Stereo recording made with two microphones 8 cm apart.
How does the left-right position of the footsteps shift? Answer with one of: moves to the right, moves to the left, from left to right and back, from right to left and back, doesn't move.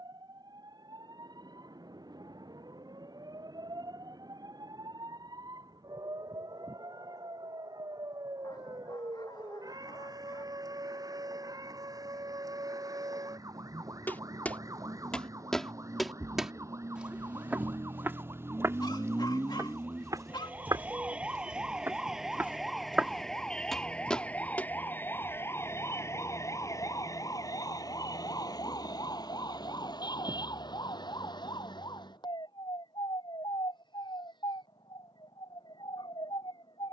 from left to right and back.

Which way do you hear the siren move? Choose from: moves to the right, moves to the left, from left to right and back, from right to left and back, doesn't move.
moves to the left.